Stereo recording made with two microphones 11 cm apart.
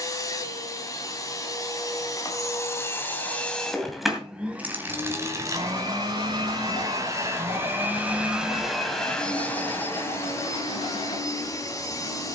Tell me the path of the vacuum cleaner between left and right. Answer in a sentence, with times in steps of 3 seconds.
In this clip you hear the vacuum cleaner on the left from 0 s, in the centre from 3 s, on the right from 6 s and on the left from 9 s.